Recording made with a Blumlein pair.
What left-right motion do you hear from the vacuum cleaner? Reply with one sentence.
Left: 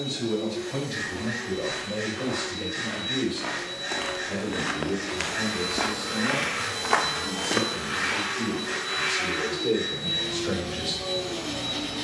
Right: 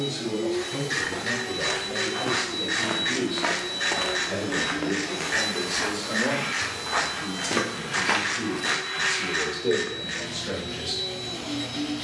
You can hear the vacuum cleaner move to the left.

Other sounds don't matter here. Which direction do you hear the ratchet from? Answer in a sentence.
In this clip you hear the ratchet on the right.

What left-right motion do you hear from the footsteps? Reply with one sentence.
In this clip you hear the footsteps move from right to left and back again.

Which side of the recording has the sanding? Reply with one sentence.
You can hear the sanding on the left.